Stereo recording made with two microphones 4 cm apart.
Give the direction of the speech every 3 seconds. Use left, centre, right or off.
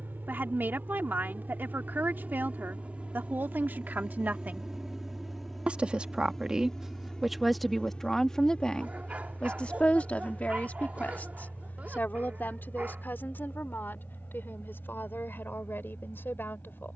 right, right, centre, left, left, left.